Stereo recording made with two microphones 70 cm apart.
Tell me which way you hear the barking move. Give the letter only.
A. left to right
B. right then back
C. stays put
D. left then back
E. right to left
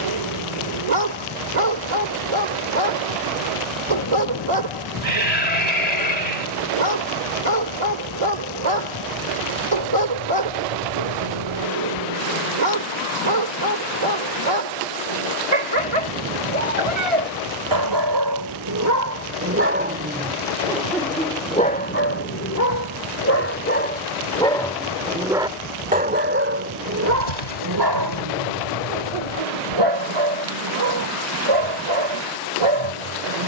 D.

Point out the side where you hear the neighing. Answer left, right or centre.
left.